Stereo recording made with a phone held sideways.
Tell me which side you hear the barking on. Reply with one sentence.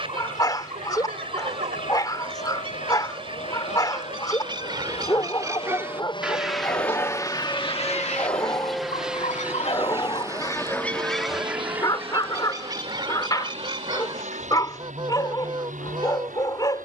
In this clip you hear the barking on the left.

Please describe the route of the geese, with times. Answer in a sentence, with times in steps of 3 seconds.
You can hear the geese on the right from 0 s, on the left from 6 s and on the right from 12 s.